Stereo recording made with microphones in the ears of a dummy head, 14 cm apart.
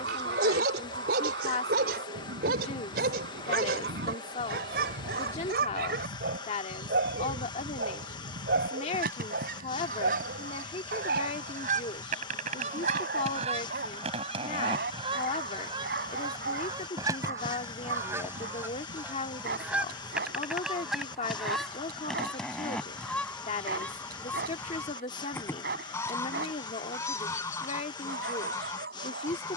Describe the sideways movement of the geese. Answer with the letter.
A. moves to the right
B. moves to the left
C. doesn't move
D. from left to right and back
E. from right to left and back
B.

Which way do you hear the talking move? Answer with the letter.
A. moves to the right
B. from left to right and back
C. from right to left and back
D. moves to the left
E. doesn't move
E.